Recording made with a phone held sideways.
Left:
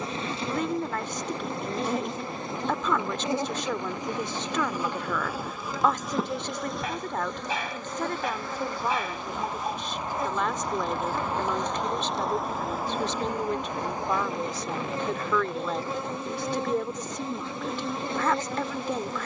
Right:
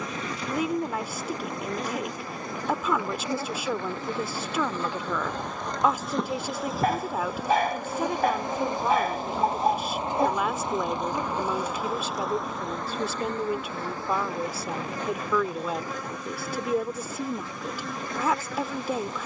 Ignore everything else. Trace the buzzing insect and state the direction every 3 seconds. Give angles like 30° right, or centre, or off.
30° left, 10° left, 10° right, 20° right, 10° left, 30° left, 30° left.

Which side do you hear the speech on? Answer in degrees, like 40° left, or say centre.
10° right.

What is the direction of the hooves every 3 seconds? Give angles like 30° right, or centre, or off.
off, 80° right, 60° right, 10° right, 40° left, off, off.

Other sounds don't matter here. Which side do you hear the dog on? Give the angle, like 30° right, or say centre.
50° right.